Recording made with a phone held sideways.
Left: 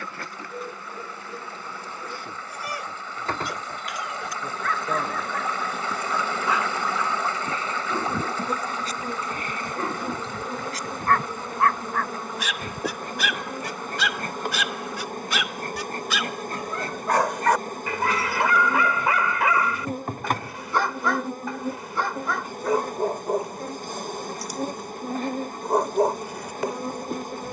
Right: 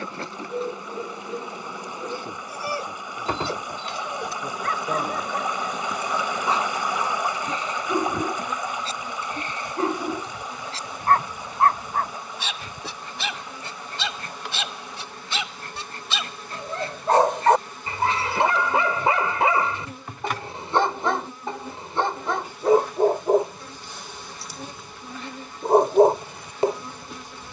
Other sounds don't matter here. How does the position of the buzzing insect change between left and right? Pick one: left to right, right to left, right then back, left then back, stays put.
right to left.